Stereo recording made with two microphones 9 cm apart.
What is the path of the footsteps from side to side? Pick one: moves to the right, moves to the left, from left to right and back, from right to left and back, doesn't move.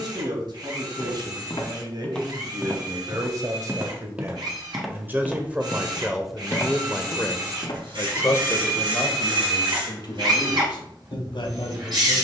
from left to right and back.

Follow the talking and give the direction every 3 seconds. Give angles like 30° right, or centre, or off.
50° right, 30° right, 20° left, 50° left.